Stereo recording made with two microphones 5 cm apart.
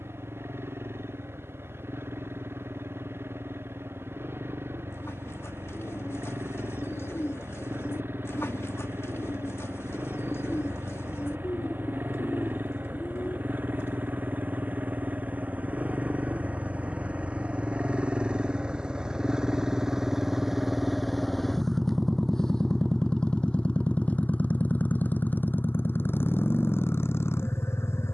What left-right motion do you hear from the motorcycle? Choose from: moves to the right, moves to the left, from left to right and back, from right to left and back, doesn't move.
moves to the left.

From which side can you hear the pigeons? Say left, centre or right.
left.